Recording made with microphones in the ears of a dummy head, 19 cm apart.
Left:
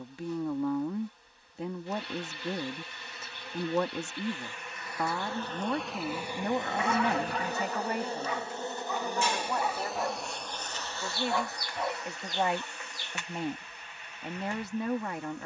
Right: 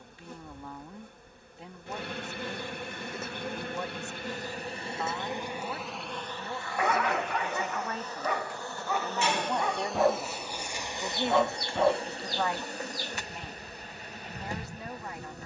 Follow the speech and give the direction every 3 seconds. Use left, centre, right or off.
left, left, left, centre, left.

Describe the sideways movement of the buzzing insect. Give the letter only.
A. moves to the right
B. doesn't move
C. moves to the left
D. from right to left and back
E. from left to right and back
D.